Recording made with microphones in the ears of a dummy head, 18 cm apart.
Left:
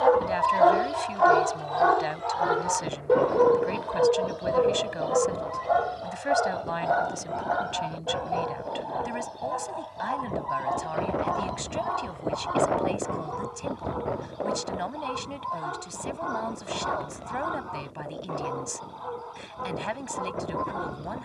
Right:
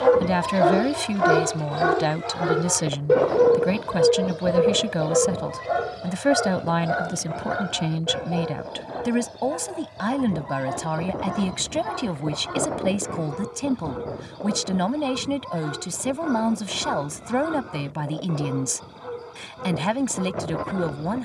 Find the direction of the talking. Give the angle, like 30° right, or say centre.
70° right.